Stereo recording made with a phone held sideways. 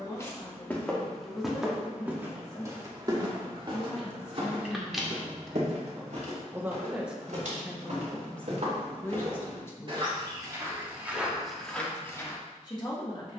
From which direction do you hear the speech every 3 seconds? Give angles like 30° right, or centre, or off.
30° left, 20° left, centre, 20° left, 30° left.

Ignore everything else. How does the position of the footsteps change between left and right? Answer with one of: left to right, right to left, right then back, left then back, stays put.
right then back.